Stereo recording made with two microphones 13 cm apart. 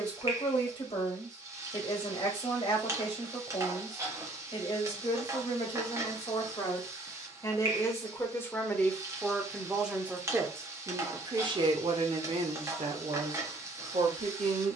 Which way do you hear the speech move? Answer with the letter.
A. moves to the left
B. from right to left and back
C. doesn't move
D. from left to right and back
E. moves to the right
E.